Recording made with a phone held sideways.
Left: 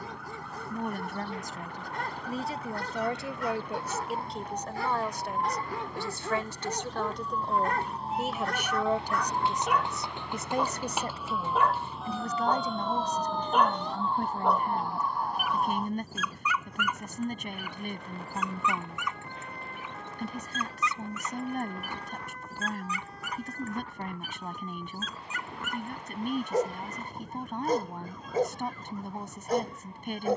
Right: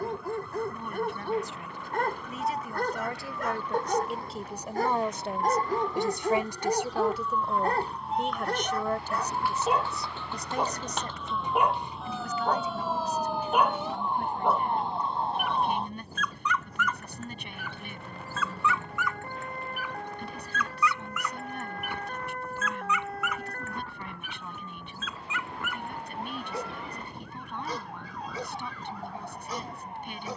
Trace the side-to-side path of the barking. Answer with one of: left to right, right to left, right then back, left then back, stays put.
right to left.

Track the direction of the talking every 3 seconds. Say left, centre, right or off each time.
left, centre, centre, left, left, left, left, left, left, left.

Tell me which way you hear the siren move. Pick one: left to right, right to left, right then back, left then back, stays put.
left to right.